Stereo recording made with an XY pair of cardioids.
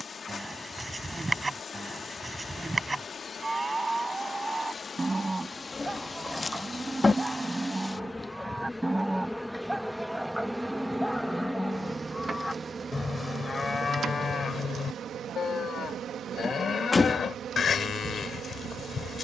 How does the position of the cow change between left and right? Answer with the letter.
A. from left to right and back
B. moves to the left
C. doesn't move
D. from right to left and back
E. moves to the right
B.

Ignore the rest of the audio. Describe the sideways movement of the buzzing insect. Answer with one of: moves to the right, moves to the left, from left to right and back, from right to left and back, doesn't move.
moves to the right.